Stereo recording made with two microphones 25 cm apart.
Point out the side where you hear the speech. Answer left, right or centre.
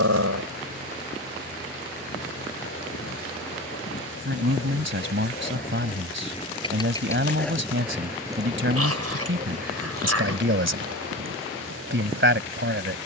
right.